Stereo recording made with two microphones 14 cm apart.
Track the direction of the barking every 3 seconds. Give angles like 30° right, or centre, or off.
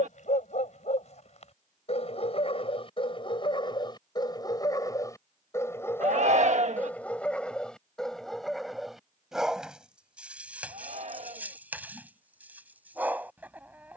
50° left, 30° left, 10° left, 10° right, 10° right.